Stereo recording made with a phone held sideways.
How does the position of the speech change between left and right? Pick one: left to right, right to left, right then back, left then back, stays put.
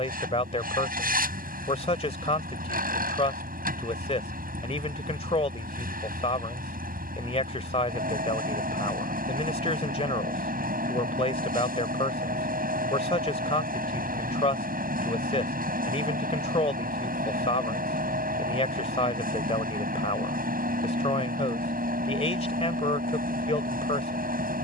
stays put.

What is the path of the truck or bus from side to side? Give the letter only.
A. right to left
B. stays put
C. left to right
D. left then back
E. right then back
B.